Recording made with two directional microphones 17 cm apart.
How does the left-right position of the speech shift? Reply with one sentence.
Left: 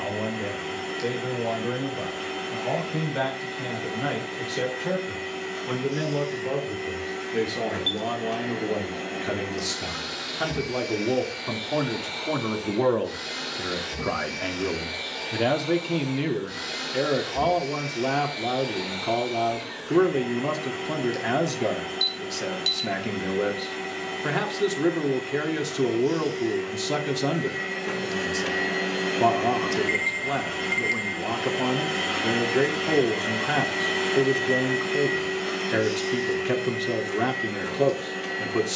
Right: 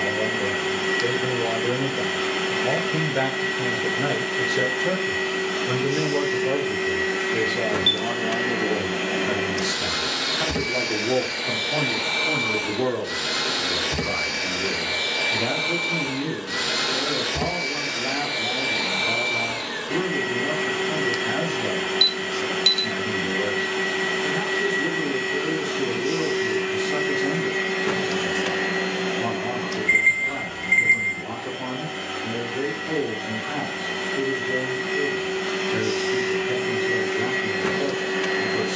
In this clip you hear the speech travel towards the left.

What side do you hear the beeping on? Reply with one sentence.
In this clip you hear the beeping on the right.